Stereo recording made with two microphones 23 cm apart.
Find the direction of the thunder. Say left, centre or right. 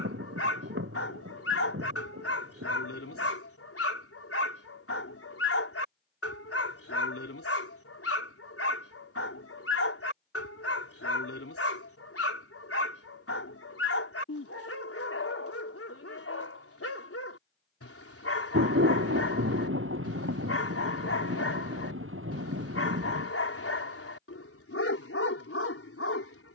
right.